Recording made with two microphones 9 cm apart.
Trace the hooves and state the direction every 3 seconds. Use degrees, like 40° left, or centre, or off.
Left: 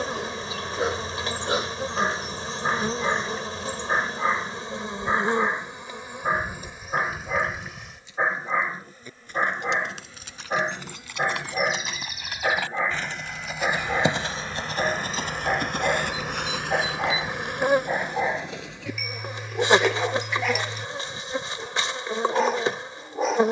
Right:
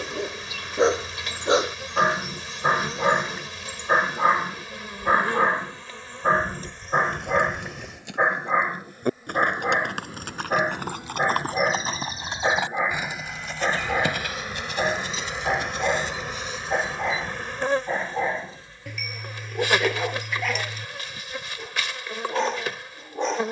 off, off, 70° right, 50° right, 10° left, 60° left, 70° left, off.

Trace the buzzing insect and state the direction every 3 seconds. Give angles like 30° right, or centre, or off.
30° left, 30° left, 10° left, 10° right, 10° right, 10° left, 20° left, 30° left.